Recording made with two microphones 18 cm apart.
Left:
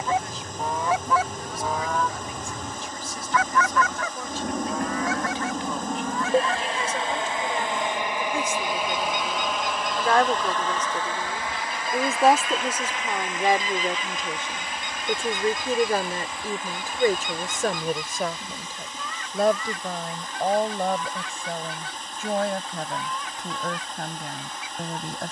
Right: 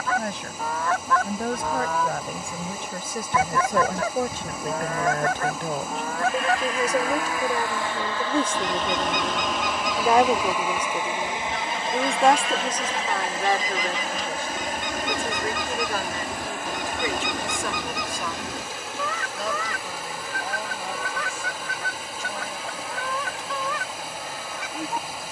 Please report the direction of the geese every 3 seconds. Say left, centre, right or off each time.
centre, right, right, right, right, right, right, right, right.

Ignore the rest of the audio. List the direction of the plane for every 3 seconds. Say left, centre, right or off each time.
left, left, left, centre, right, right, right, right, right.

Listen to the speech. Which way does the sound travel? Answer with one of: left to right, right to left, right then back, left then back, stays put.
right to left.